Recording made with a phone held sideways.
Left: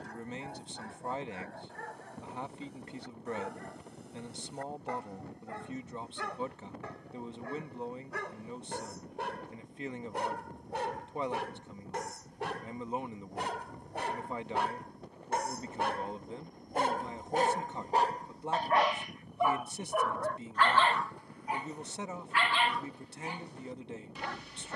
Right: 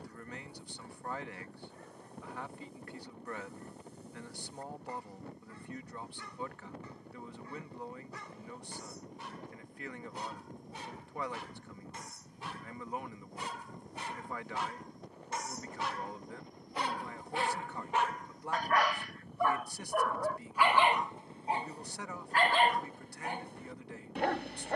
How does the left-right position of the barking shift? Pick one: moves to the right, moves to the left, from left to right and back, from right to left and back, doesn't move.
moves to the right.